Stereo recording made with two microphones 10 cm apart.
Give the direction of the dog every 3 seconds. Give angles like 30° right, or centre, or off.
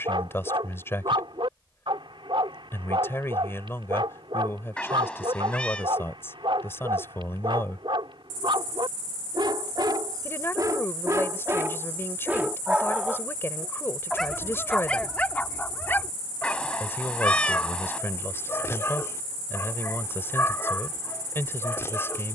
60° right, 60° right, 60° right, 40° right, centre, 20° left, 30° left, 30° left.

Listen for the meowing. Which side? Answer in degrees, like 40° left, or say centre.
10° left.